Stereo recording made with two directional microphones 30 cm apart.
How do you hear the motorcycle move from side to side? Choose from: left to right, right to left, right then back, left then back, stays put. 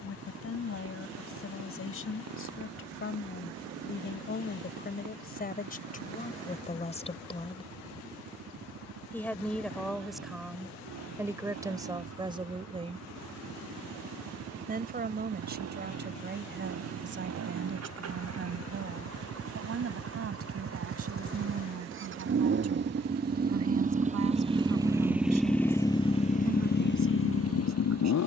right to left.